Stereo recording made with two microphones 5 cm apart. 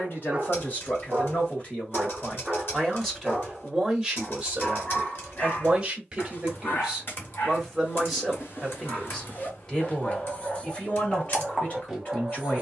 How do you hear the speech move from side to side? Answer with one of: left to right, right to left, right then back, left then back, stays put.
right then back.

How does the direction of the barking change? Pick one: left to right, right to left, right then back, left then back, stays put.
left then back.